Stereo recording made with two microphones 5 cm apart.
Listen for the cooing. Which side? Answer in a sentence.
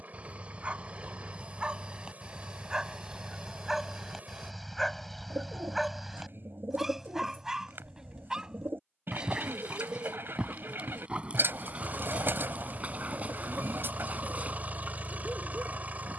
You can hear the cooing on the right.